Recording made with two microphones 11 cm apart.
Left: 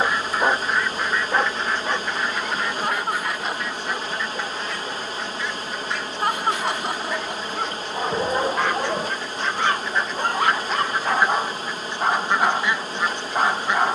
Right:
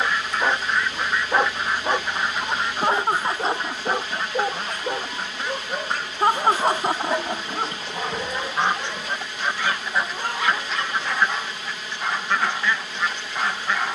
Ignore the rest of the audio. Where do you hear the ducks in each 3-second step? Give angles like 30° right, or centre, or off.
10° right, 40° right, 30° right, centre, 20° left.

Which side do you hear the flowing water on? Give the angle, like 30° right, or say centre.
40° left.